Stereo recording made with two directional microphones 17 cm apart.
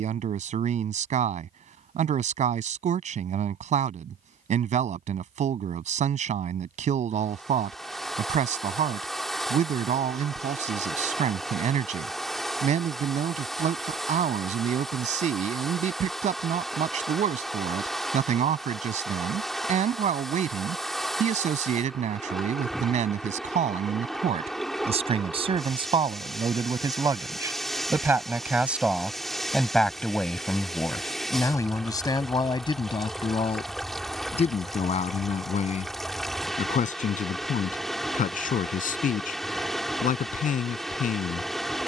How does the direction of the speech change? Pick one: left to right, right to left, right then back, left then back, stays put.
right to left.